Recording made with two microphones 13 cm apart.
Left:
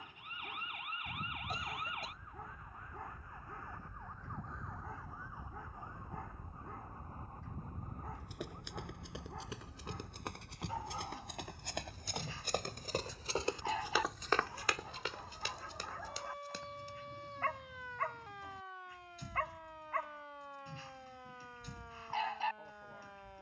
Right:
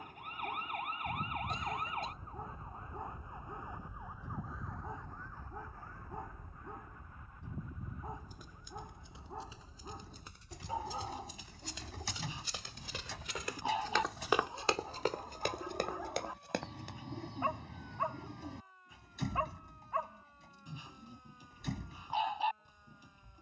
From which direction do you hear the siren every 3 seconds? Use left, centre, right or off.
right, centre, left, left, left, left, left, left.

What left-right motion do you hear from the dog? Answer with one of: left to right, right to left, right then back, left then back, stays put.
stays put.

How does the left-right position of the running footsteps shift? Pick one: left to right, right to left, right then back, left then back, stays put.
left to right.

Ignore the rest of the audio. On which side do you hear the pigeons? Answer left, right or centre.
right.